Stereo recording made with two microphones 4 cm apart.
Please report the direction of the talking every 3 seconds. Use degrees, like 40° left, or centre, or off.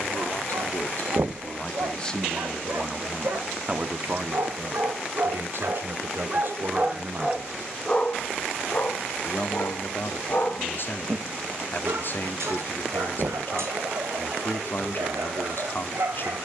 30° left, 40° right, 40° right, 50° left, 50° left, 50° left.